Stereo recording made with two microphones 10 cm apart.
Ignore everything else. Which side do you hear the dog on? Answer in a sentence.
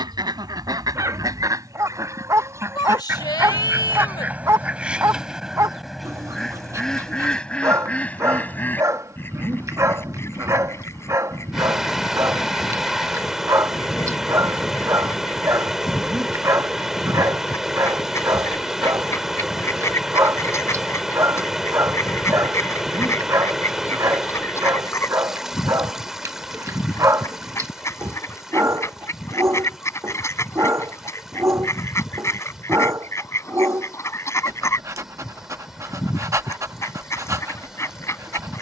In this clip you hear the dog on the right.